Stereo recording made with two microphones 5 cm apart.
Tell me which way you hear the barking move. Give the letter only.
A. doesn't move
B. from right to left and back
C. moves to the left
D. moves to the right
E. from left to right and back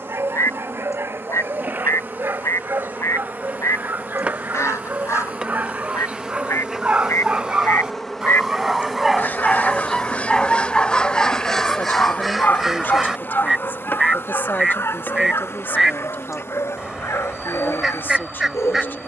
C.